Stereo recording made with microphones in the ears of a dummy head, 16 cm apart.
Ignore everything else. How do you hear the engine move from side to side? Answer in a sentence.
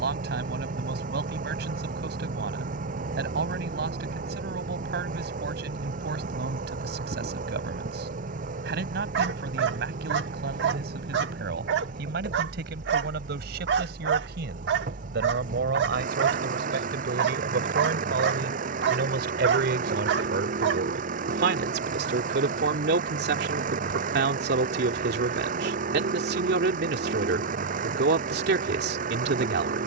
In this clip you hear the engine stay put.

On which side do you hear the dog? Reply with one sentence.
In this clip you hear the dog on the right.